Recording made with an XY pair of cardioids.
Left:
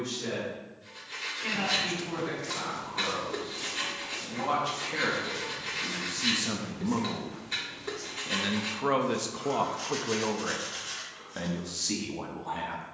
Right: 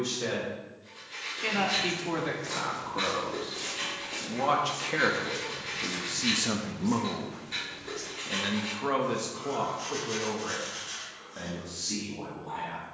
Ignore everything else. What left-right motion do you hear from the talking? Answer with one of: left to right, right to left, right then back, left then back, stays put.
right to left.